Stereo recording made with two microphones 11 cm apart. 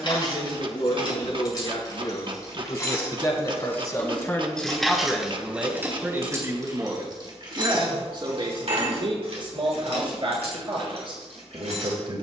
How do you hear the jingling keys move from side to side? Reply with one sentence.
In this clip you hear the jingling keys travel towards the right.